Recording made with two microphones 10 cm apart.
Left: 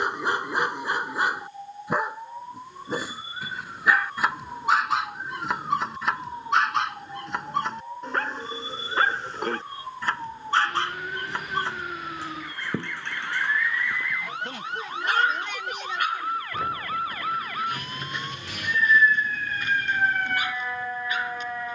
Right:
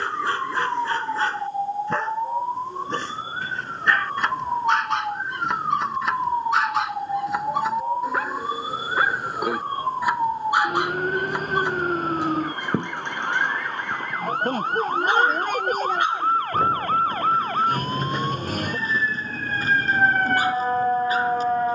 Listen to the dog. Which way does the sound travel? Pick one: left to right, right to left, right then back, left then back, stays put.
left to right.